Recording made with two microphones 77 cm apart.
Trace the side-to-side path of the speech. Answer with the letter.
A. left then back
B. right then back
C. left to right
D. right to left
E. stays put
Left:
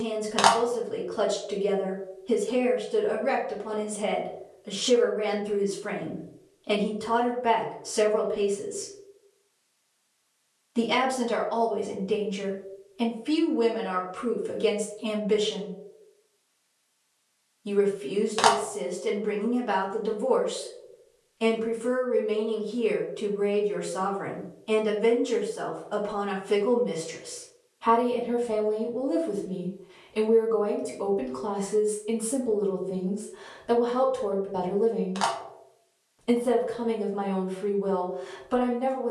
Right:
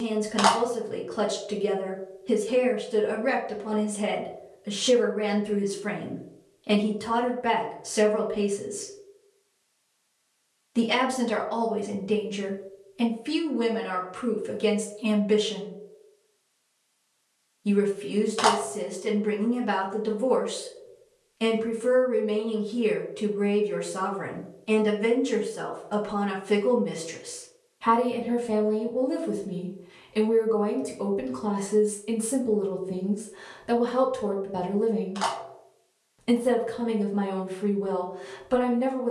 E.